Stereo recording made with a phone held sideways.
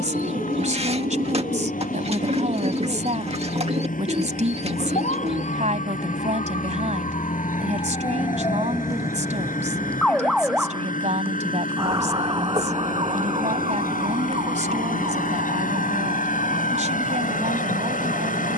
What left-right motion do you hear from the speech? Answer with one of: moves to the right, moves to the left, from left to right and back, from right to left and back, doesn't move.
doesn't move.